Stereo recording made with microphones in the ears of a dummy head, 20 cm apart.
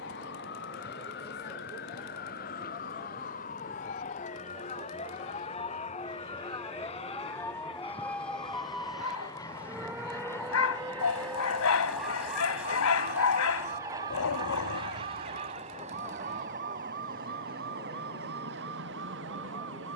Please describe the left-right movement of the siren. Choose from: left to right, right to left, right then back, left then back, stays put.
left to right.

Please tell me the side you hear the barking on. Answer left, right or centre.
left.